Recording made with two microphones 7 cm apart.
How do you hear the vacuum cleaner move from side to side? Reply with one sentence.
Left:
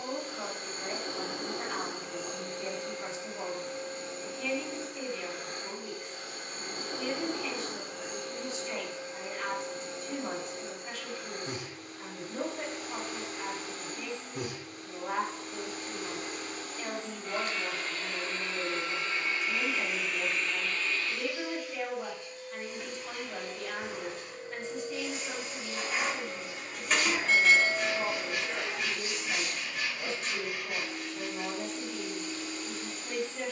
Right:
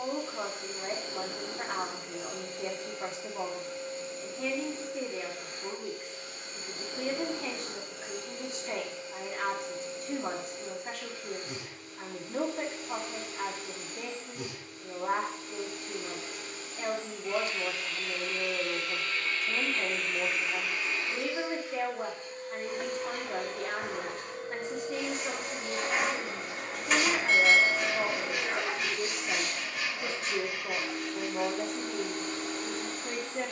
In this clip you hear the vacuum cleaner move from left to right.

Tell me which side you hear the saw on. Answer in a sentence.
In this clip you hear the saw in the centre.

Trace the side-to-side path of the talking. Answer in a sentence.
You can hear the talking stay put.